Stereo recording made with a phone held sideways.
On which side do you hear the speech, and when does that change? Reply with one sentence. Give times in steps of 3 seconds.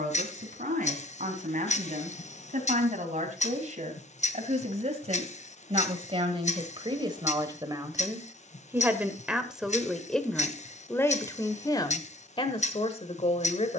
You can hear the speech on the right from 0 s, in the centre from 9 s and on the left from 12 s.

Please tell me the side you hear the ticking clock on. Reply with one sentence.
You can hear the ticking clock on the left.